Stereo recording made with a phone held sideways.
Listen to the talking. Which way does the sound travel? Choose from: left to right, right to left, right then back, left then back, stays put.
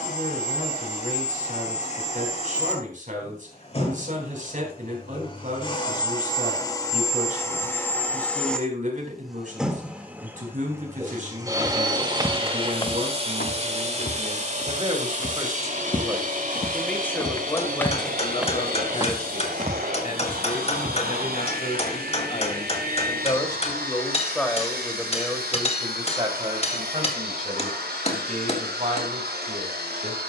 left then back.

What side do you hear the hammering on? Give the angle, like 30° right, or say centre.
40° left.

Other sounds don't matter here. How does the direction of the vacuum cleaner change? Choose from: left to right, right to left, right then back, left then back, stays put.
left to right.